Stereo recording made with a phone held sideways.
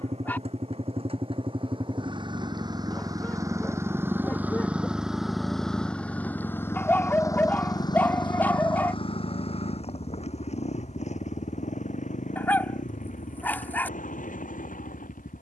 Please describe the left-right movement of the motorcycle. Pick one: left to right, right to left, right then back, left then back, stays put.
right to left.